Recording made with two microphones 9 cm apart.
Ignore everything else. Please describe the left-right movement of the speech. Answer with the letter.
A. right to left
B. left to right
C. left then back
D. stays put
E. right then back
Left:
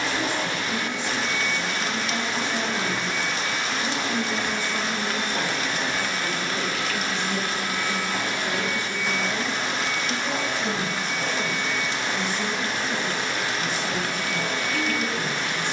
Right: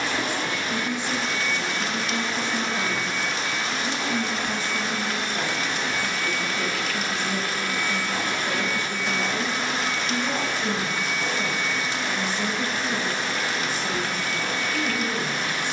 C.